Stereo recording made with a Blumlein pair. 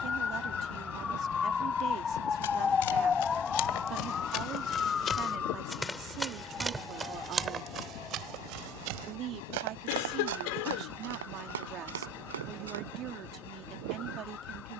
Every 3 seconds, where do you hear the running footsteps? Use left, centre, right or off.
left, left, right, right, right.